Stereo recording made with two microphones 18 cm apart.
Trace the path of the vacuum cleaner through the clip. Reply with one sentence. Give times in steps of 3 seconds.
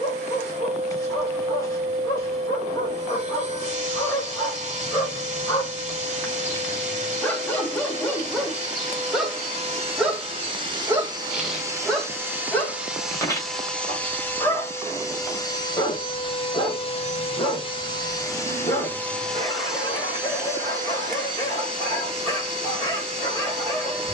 In this clip you hear the vacuum cleaner on the right from 0 s, in the centre from 12 s, on the left from 15 s, in the centre from 18 s and on the right from 21 s.